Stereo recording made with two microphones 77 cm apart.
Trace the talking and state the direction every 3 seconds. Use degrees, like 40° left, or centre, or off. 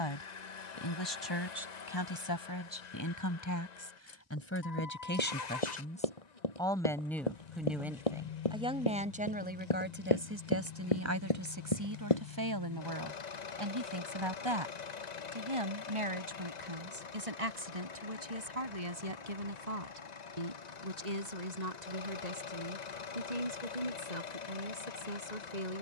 30° left, 20° left, centre, 20° right, 30° right, 40° right, 50° right, 60° right, 60° right.